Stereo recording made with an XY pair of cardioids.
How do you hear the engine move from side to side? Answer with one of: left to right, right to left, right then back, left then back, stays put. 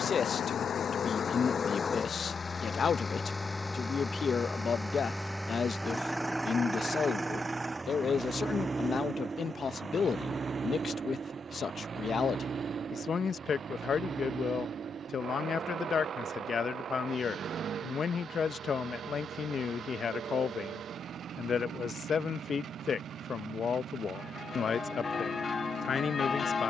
left to right.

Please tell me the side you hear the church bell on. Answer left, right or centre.
left.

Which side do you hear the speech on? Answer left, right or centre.
left.